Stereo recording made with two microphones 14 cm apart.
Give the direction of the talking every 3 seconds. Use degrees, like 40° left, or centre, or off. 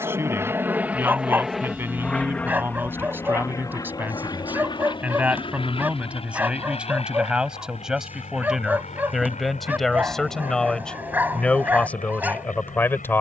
20° right, 10° right, 10° right, centre, 10° left.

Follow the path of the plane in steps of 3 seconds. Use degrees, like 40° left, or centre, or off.
centre, 30° left, 40° left, 50° left, 60° left.